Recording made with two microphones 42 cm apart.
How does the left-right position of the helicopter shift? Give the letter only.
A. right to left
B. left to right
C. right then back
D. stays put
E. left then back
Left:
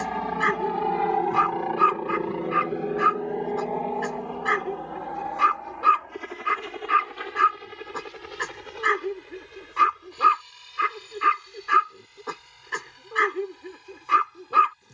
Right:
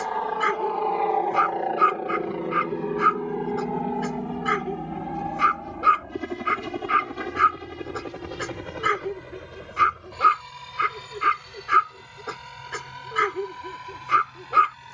B.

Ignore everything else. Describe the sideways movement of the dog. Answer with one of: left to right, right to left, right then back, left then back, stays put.
stays put.